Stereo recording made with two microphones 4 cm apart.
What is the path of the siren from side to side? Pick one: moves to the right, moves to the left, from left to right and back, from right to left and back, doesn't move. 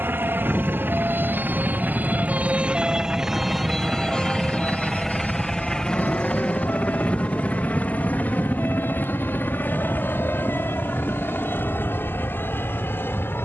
moves to the left.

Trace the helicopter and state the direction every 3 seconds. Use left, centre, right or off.
right, centre, left, left, left.